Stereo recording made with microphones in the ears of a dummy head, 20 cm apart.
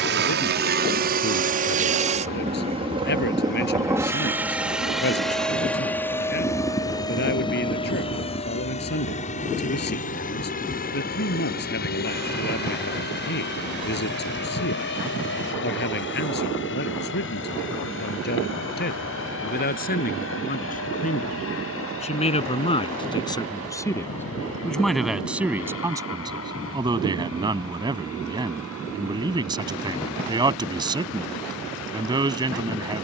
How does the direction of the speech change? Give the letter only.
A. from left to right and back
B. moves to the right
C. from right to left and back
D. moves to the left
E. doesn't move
B.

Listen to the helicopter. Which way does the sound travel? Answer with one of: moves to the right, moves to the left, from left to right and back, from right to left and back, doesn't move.
moves to the left.